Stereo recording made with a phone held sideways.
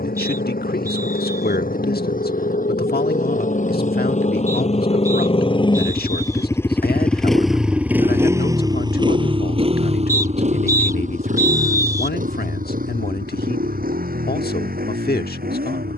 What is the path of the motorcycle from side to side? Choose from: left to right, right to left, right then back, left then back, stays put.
left to right.